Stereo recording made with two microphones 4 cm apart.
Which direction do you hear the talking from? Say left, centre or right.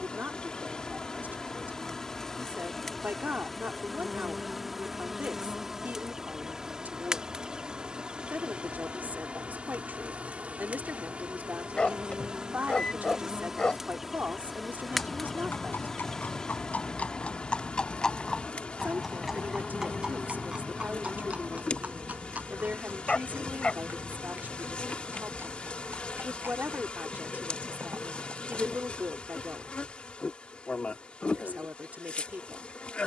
right.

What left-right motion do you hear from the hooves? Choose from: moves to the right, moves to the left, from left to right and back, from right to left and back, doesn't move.
moves to the right.